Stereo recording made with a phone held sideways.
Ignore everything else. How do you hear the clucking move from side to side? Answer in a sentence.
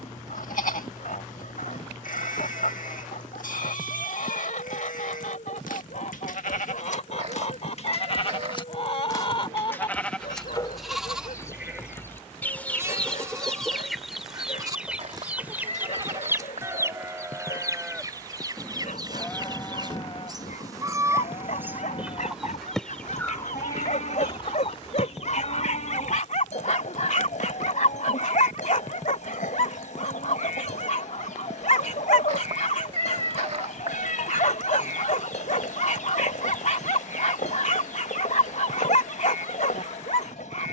In this clip you hear the clucking go right and come back.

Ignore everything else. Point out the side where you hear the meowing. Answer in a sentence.
You can hear the meowing on the right.